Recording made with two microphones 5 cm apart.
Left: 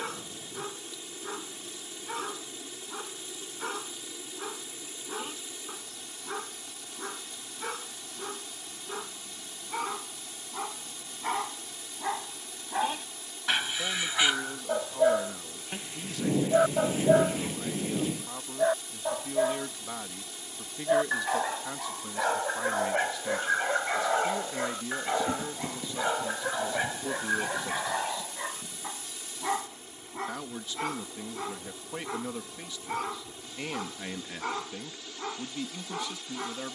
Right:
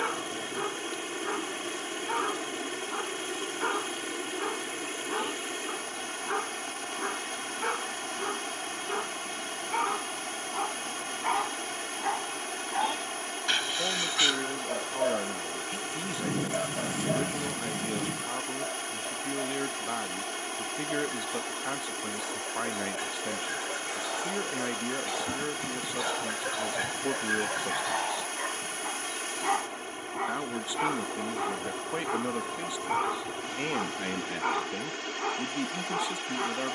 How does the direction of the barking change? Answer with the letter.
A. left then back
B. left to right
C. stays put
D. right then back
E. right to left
A.